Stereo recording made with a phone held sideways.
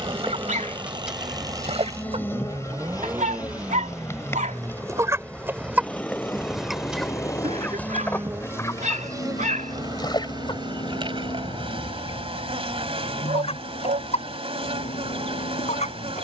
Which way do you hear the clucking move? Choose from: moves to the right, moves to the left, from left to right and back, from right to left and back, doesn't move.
moves to the left.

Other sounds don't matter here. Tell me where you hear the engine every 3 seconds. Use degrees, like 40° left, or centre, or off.
30° right, centre, 20° left, 40° left, 60° left, 60° left.